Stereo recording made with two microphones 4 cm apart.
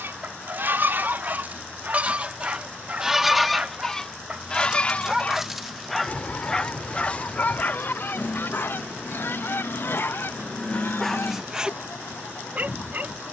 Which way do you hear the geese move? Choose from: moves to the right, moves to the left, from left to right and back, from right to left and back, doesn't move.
moves to the left.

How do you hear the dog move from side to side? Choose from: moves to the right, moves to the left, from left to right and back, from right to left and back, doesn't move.
from right to left and back.